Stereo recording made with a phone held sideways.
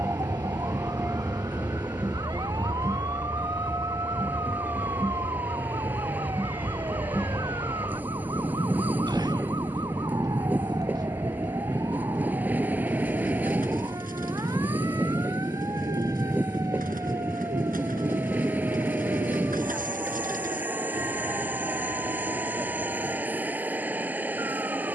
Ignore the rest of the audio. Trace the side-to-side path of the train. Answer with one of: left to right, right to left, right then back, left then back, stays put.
stays put.